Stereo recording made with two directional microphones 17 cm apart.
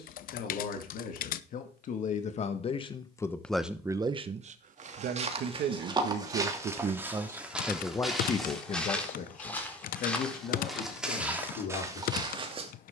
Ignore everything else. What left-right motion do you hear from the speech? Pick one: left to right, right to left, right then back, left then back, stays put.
right then back.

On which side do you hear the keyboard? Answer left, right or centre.
left.